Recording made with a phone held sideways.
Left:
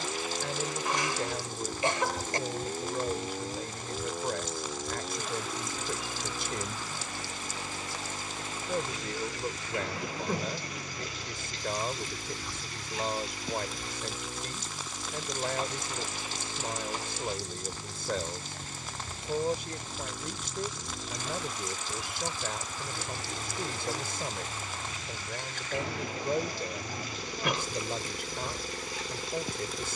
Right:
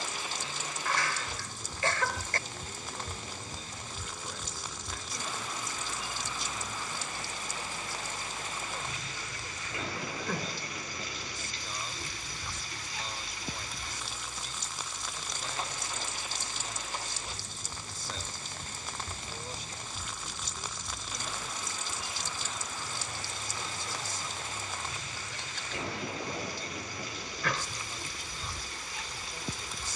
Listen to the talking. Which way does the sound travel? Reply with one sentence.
You can hear the talking stay in one place.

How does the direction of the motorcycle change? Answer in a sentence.
You can hear the motorcycle stay in one place.